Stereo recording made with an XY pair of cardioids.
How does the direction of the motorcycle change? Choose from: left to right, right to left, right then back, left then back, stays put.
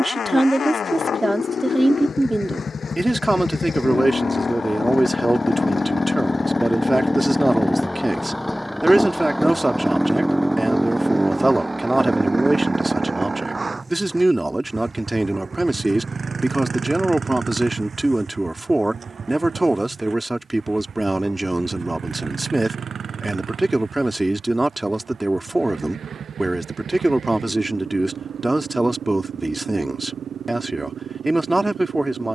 left to right.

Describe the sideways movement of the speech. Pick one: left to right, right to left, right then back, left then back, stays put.
stays put.